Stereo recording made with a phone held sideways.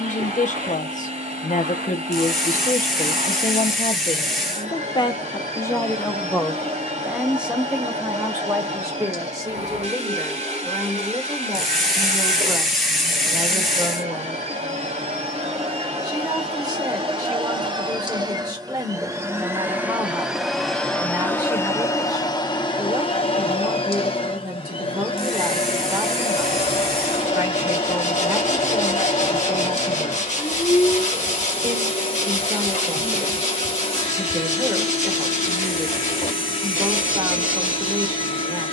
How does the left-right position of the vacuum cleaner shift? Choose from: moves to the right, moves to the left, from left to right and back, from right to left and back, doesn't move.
moves to the left.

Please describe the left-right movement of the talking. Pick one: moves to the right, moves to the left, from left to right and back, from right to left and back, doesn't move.
moves to the right.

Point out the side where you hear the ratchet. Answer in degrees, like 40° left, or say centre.
centre.